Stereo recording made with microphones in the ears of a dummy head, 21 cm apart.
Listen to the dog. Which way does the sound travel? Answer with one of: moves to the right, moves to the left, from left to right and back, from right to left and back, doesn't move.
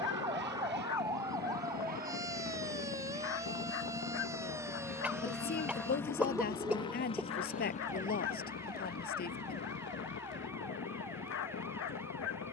doesn't move.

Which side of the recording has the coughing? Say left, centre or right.
centre.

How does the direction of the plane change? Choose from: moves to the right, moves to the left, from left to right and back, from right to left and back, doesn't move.
moves to the left.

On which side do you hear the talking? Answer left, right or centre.
left.